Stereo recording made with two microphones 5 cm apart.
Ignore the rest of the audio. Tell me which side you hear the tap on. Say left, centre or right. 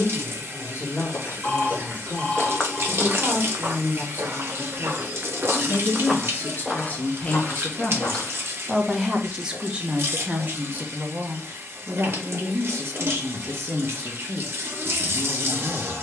right.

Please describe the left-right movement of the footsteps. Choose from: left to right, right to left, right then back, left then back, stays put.
right then back.